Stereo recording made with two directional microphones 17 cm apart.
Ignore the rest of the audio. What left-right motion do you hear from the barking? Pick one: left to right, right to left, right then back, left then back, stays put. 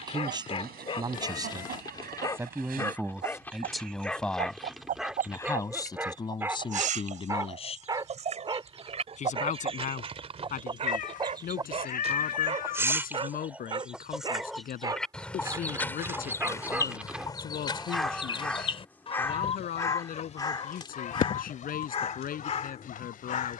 right then back.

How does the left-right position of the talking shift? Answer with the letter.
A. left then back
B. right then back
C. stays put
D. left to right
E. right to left
E.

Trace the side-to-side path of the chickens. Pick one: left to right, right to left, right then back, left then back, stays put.
right to left.